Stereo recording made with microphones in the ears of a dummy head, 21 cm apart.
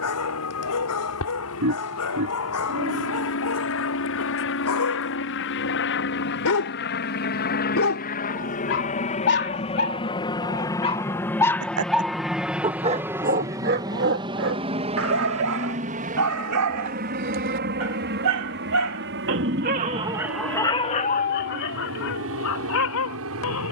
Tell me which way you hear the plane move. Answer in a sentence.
In this clip you hear the plane move from left to right.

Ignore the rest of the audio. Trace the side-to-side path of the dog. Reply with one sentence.
In this clip you hear the dog move from left to right and back again.